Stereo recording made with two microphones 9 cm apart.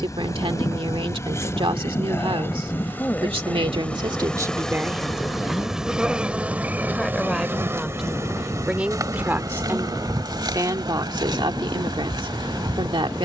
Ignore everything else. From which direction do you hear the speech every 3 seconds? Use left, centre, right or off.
right, right, centre, right, right.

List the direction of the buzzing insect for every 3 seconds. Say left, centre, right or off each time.
left, centre, right, right, right.